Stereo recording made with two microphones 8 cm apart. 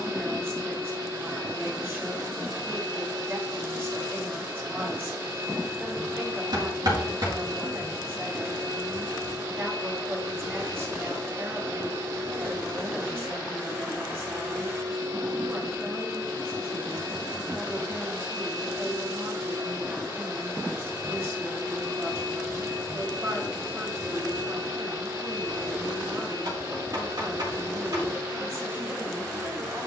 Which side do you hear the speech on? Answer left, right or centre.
right.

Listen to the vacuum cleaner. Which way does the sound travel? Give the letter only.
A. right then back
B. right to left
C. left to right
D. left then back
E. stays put
E.